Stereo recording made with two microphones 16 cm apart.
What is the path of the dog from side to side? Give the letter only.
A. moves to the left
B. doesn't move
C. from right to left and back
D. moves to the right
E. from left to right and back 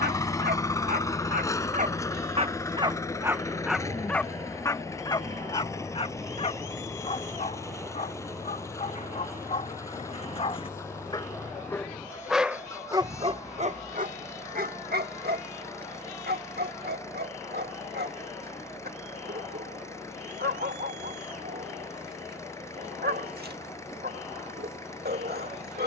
C.